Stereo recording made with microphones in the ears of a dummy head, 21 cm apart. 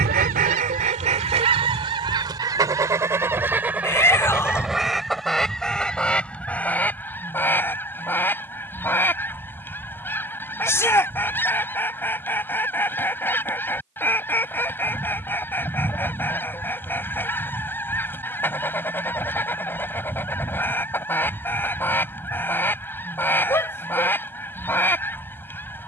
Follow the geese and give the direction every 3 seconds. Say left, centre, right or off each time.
right, centre, centre, centre, centre, centre, centre, centre, centre.